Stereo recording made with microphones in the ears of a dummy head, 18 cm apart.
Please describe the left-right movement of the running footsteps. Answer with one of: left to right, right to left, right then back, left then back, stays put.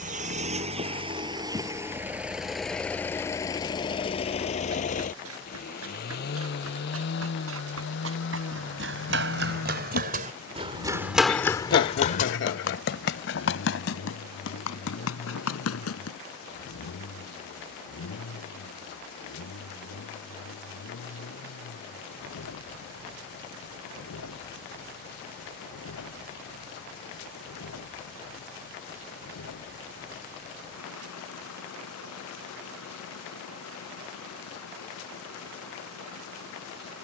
right to left.